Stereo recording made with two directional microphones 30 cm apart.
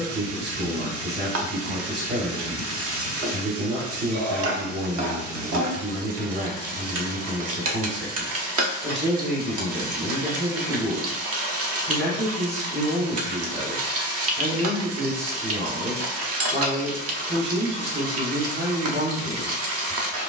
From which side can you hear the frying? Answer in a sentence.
You can hear the frying on the right.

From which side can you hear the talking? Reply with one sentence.
You can hear the talking on the right.